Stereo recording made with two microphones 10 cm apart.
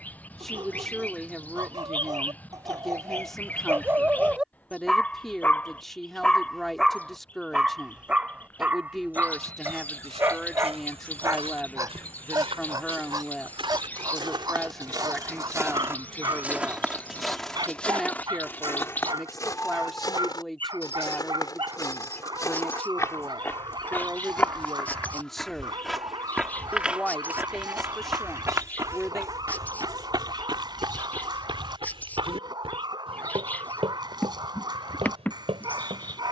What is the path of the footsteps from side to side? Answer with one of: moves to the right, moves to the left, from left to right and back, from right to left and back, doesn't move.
from right to left and back.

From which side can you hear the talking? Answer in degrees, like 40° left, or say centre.
centre.